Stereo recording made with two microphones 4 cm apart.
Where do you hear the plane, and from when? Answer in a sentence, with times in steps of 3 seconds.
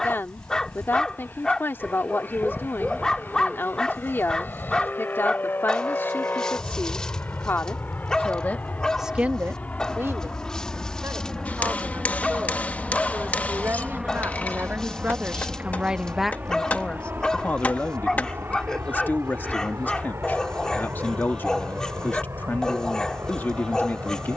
In this clip you hear the plane on the left from 0 s, in the centre from 12 s and on the right from 15 s.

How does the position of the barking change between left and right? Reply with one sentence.
In this clip you hear the barking stay put.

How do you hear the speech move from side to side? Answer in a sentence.
In this clip you hear the speech move from left to right and back again.